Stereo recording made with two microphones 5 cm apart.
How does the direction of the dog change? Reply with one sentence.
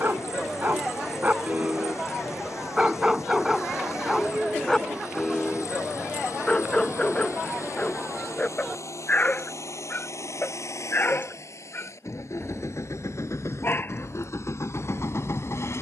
You can hear the dog go from the right side to the left.